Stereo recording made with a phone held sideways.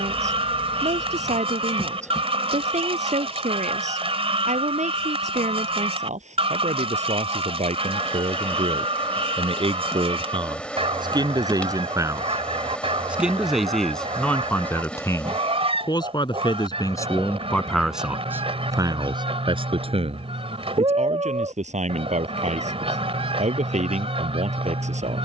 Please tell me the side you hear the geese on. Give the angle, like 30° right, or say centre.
40° right.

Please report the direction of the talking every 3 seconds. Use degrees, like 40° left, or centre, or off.
60° right, 60° right, 50° right, 30° right, centre, 20° left, 30° right, 60° right, 60° right.